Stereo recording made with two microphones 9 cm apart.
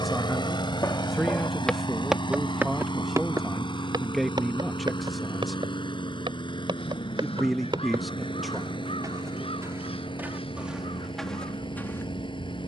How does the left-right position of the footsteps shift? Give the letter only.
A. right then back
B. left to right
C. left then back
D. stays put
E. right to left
A.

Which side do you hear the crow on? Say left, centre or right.
left.